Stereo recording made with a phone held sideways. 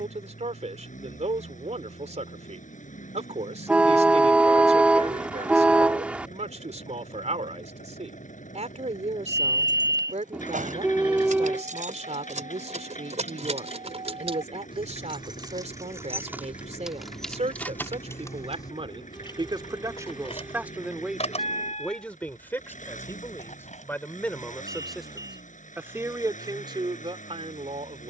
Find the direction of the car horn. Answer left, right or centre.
centre.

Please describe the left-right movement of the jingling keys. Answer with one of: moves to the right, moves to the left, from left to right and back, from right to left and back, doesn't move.
moves to the left.